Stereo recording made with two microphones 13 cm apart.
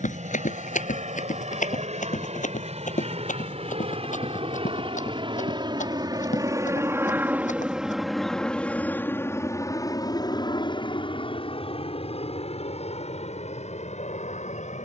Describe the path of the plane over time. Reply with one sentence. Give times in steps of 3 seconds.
You can hear the plane on the right from 0 s, in the centre from 6 s and on the left from 9 s.